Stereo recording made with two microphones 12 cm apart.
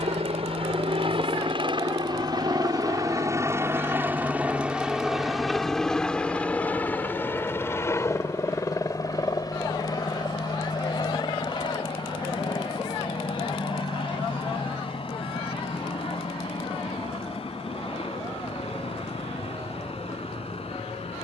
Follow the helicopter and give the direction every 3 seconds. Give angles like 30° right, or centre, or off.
50° right, 10° right, 20° left, 40° left, 40° left, 50° left, 50° left.